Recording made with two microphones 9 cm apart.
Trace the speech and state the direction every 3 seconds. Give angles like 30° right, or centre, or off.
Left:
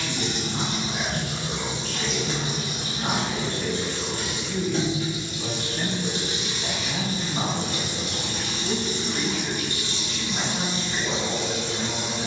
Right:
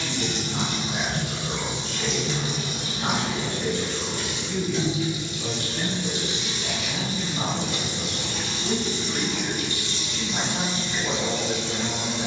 30° right, centre, 20° left, 30° right.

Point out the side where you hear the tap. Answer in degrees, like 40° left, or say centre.
50° left.